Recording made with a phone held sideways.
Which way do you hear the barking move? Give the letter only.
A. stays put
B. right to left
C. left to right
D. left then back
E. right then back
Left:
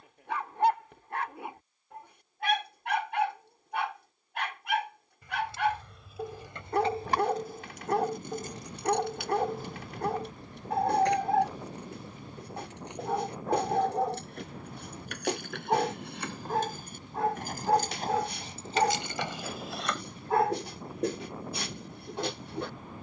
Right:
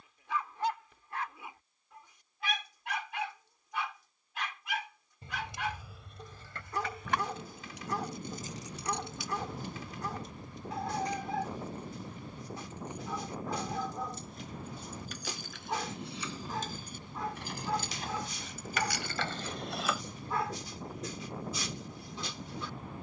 A.